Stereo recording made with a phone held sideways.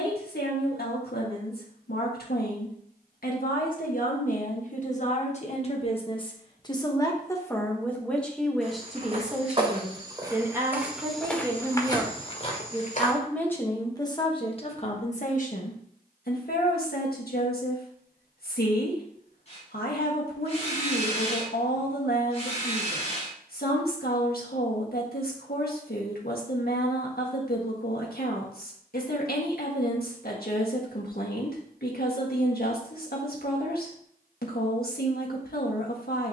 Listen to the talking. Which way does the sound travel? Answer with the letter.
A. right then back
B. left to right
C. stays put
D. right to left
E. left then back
A.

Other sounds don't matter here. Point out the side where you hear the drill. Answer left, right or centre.
left.